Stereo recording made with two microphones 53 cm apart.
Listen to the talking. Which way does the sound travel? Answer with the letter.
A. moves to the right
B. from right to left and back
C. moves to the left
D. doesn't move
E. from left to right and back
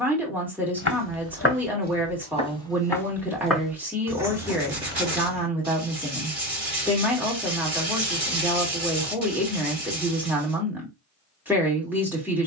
D.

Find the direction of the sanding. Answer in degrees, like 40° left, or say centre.
70° right.